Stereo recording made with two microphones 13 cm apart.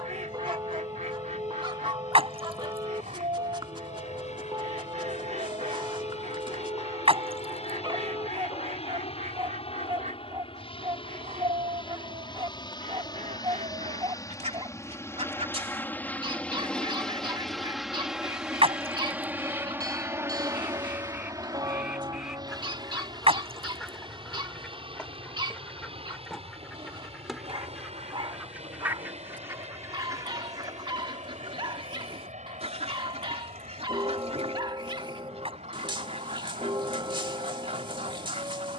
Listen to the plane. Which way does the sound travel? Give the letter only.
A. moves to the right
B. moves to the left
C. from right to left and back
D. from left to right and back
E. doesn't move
A.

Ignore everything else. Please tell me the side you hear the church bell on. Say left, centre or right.
right.